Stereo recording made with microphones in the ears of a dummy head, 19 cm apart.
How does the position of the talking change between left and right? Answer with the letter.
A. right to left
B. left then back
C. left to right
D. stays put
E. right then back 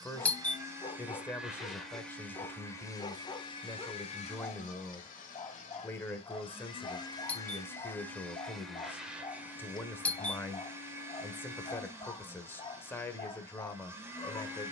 D.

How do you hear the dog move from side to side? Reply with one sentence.
In this clip you hear the dog stay in one place.